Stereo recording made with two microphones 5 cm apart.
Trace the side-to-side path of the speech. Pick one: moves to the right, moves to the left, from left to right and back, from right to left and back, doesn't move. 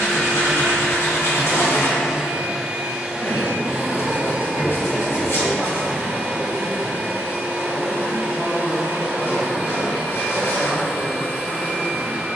moves to the right.